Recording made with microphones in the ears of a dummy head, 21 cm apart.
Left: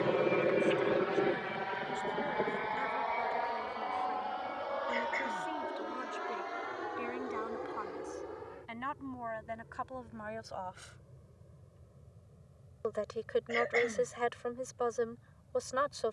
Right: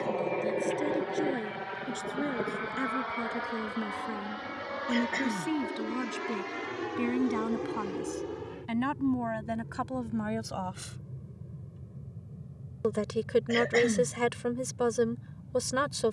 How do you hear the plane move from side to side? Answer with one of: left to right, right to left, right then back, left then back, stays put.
left to right.